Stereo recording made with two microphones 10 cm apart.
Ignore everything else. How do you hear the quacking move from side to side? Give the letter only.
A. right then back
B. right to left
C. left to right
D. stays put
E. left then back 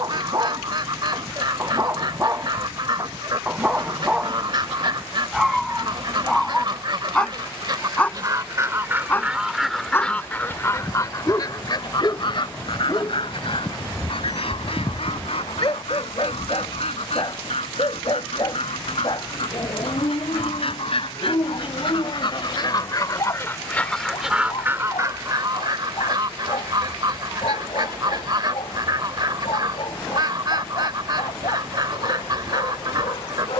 E.